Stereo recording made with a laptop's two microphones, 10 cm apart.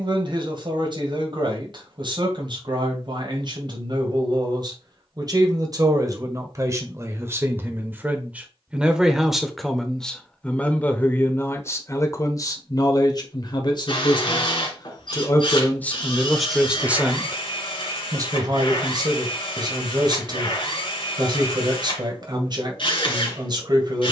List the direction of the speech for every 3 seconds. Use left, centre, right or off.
right, right, right, centre, left, centre, right, right.